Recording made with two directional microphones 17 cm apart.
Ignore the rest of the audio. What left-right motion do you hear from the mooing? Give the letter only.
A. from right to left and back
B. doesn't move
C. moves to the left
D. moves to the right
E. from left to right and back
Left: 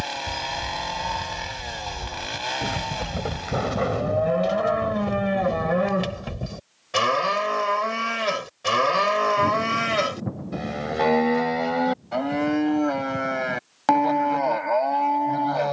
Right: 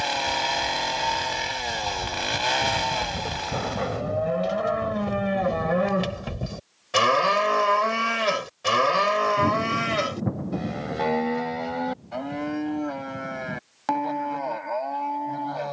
E.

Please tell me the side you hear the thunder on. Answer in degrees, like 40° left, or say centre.
20° right.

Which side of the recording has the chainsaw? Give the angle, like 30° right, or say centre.
30° right.